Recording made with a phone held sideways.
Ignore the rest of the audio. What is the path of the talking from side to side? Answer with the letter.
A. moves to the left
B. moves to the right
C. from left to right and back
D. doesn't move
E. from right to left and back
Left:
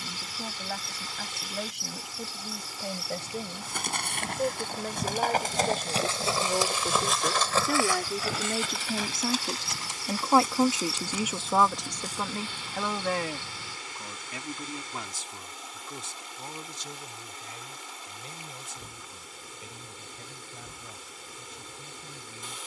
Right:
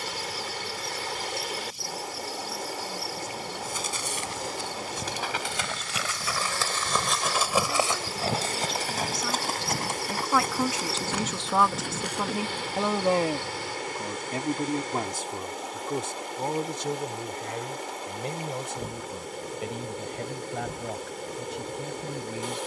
B.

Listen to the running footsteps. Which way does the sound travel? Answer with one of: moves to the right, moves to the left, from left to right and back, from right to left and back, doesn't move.
moves to the right.